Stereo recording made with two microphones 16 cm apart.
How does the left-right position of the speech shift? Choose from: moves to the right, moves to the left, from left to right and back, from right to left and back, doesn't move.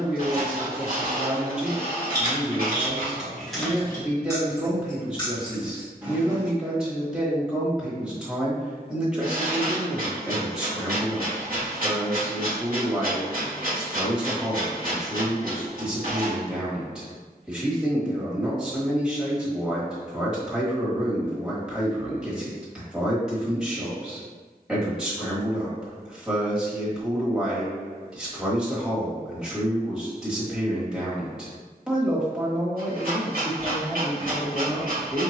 doesn't move.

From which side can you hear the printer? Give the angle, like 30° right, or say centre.
60° right.